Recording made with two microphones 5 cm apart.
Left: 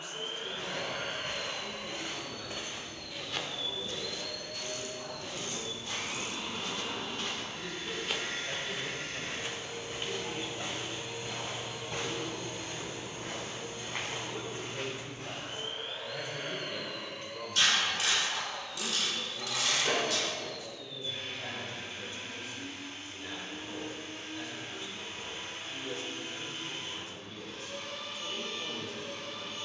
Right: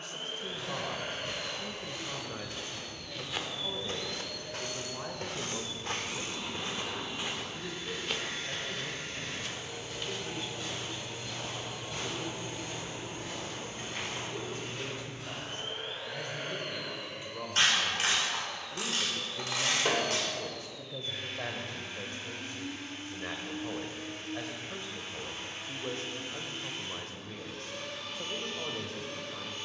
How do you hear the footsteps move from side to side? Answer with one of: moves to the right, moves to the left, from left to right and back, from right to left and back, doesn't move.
from left to right and back.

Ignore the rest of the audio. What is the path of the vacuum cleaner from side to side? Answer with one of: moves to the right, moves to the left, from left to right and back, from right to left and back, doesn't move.
moves to the right.